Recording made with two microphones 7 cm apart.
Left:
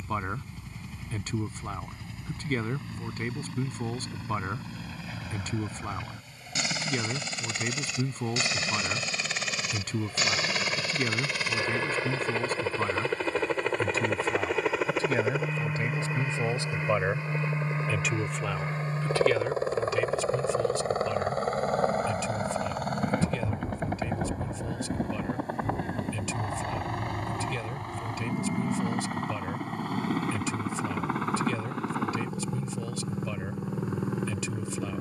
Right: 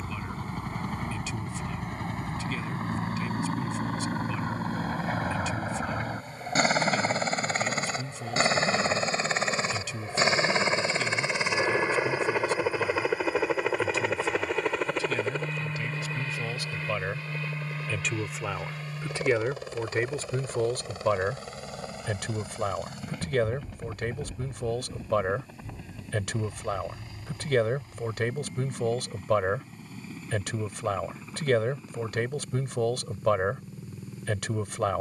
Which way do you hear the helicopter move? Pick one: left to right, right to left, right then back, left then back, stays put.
right to left.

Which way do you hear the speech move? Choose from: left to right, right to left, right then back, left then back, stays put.
left to right.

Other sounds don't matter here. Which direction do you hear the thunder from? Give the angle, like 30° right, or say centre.
50° left.